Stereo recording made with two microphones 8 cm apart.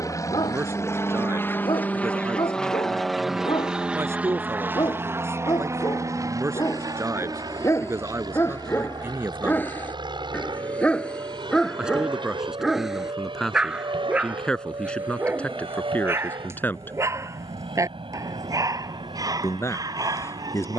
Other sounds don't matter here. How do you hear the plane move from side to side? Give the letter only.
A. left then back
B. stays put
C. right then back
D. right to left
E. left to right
E.